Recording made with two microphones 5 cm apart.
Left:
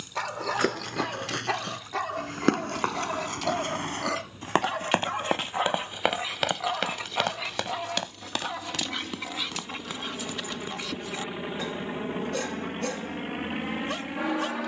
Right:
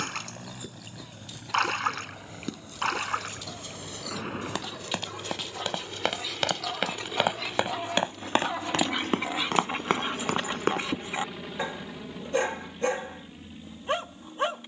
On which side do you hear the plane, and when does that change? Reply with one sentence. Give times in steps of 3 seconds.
You can hear the plane on the right from 0 s, in the centre from 9 s and on the left from 12 s.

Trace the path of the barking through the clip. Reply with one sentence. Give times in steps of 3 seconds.
In this clip you hear the barking on the left from 0 s, in the centre from 6 s and on the right from 9 s.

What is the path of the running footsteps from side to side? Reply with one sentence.
In this clip you hear the running footsteps move from left to right.